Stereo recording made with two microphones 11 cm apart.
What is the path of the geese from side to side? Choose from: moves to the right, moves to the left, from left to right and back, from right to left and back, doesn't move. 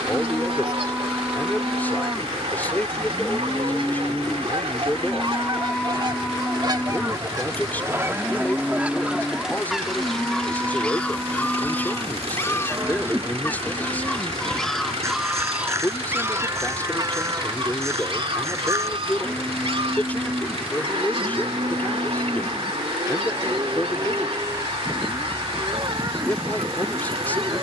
from right to left and back.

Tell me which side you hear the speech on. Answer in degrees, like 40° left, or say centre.
20° left.